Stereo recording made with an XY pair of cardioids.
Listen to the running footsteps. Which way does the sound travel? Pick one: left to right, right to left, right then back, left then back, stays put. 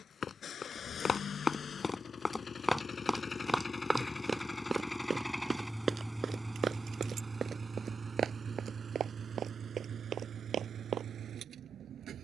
left to right.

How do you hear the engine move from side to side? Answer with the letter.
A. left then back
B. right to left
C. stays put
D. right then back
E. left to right
E.